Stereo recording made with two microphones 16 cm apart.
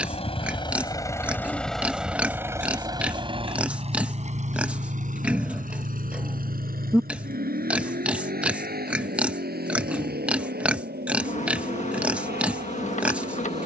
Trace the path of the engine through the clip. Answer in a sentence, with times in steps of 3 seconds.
You can hear the engine in the centre from 0 s and on the right from 3 s.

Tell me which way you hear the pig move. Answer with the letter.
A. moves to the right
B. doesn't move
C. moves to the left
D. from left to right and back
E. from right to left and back
B.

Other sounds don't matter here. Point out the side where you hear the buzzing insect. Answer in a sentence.
You can hear the buzzing insect on the left.